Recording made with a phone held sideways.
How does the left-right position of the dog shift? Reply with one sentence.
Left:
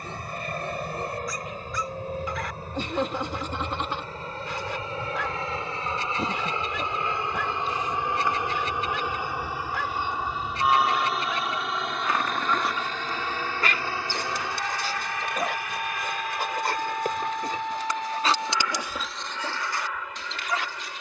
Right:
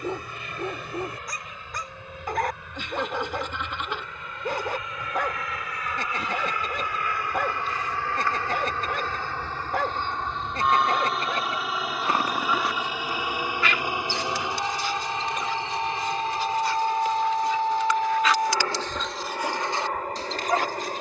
In this clip you hear the dog move from right to left and back again.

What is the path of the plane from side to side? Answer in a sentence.
You can hear the plane travel towards the right.